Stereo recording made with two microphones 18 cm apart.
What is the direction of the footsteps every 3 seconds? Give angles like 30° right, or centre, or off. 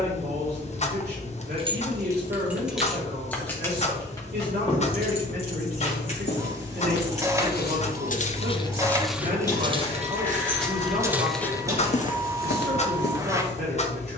off, off, 60° left, 10° right, 60° left.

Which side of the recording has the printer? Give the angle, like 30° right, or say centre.
20° right.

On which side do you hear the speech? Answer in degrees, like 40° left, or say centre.
70° right.